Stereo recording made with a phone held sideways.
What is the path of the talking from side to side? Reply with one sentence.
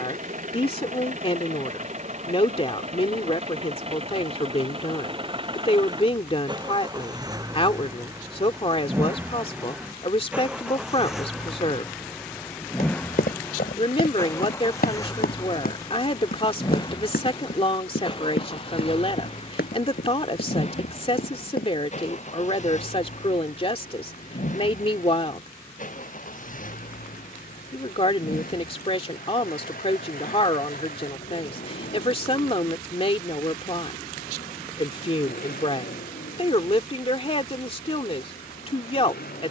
In this clip you hear the talking stay in one place.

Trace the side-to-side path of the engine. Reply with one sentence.
You can hear the engine go from the right side to the left.